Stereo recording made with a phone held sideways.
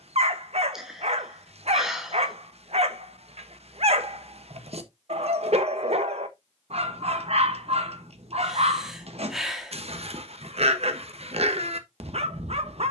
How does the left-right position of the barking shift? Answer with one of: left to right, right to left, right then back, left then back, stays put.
stays put.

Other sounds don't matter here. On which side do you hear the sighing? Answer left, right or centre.
centre.